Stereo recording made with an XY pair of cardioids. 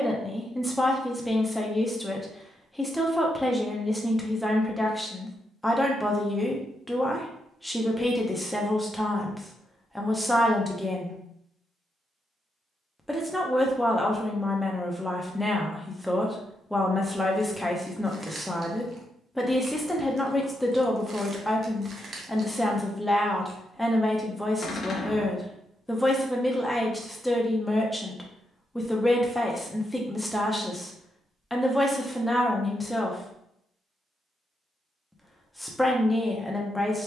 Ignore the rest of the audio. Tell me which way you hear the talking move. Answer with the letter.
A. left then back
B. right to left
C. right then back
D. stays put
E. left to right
D.